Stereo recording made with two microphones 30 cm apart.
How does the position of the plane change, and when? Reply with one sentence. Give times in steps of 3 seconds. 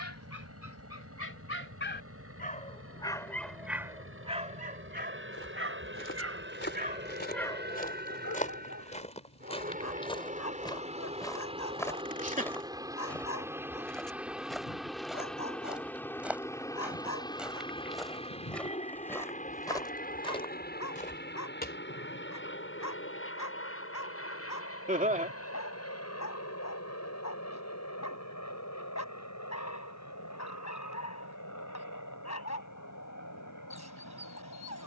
In this clip you hear the plane on the right from 0 s, in the centre from 12 s and on the left from 18 s.